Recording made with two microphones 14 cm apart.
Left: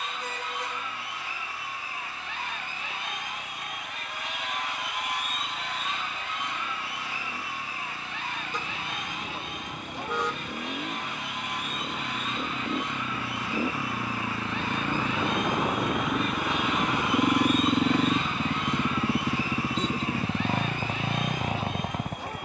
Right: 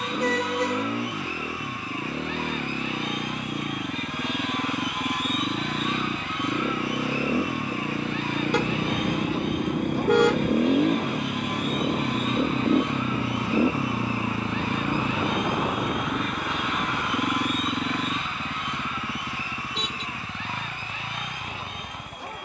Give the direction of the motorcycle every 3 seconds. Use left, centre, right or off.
right, right, right, right, right, centre, left, left.